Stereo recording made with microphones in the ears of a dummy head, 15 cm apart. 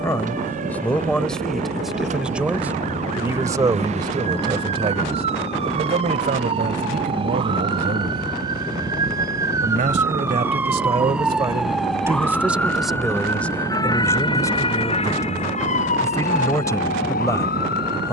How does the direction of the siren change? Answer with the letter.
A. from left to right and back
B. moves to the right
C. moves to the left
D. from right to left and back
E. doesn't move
C.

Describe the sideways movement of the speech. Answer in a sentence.
In this clip you hear the speech move from left to right and back again.